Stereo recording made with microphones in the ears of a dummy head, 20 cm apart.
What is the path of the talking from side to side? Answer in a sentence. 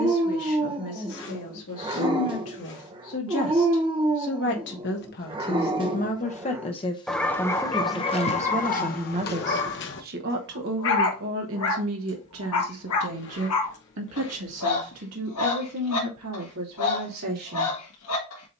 You can hear the talking go from the left side to the right.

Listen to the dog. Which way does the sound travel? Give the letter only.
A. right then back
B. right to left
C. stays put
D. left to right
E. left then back
B.